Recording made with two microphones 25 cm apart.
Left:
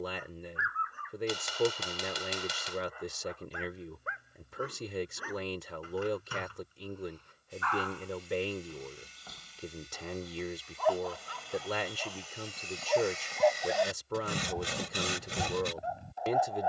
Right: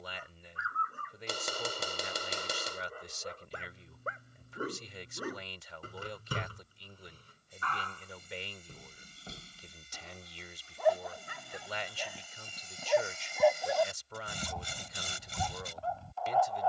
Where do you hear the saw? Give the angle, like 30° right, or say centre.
80° left.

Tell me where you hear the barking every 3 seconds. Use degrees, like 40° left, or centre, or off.
40° right, 40° right, 30° right, 20° right, centre, 20° left.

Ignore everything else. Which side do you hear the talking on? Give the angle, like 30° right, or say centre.
60° left.